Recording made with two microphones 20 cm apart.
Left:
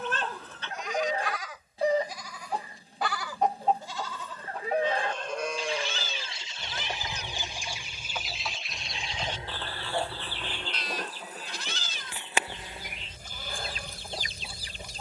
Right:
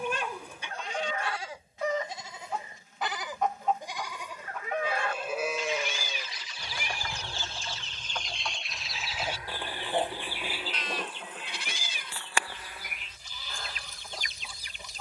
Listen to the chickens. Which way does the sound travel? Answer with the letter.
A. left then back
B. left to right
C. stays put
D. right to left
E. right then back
E.